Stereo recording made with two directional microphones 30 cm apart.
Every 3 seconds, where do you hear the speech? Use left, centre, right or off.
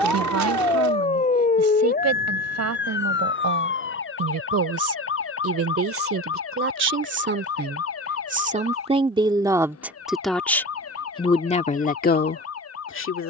right, right, right, centre, left.